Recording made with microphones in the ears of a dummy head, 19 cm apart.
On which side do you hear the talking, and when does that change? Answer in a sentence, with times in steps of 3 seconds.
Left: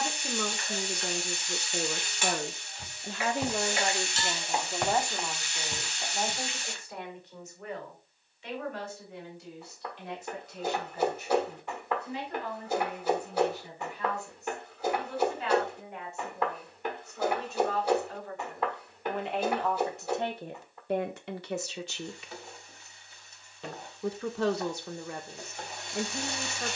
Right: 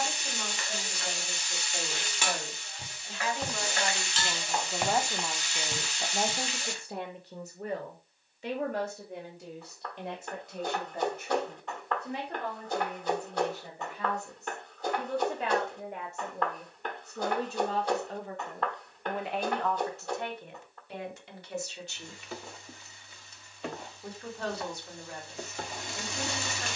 You can hear the talking on the left from 0 s, in the centre from 3 s, on the right from 6 s, in the centre from 18 s and on the left from 21 s.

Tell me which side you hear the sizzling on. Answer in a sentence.
You can hear the sizzling on the right.